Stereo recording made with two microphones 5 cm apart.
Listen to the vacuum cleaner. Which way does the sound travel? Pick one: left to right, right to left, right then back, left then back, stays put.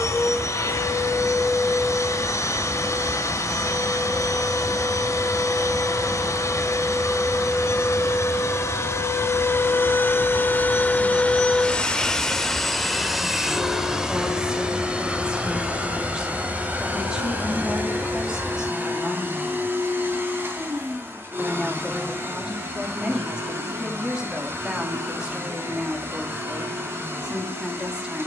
left to right.